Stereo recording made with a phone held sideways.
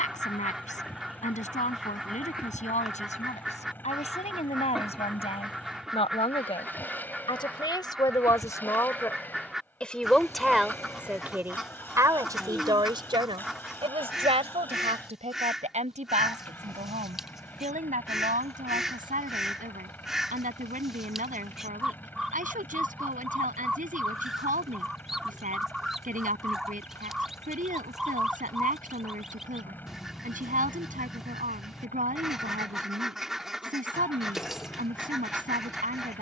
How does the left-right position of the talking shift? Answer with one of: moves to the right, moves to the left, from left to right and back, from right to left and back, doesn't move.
moves to the right.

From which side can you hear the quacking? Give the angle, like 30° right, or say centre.
centre.